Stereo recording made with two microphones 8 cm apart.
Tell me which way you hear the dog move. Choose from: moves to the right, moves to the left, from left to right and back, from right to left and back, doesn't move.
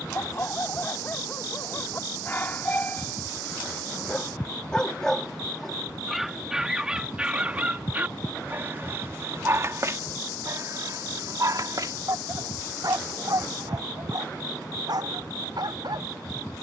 moves to the right.